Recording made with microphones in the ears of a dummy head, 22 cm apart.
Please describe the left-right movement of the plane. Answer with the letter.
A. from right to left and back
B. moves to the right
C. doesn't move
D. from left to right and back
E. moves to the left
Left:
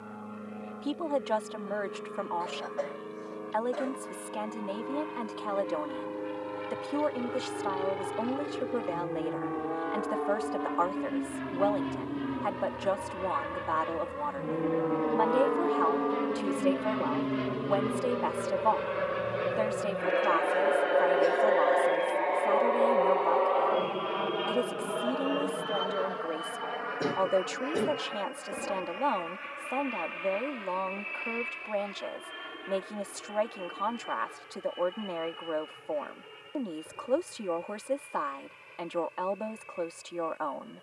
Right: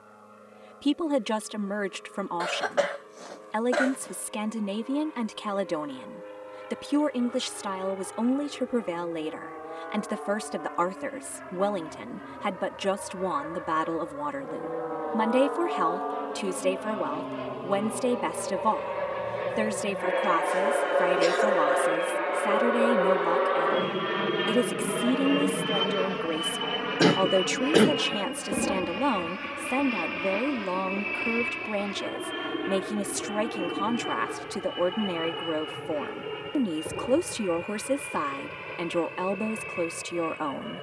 B.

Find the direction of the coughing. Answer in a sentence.
In this clip you hear the coughing on the right.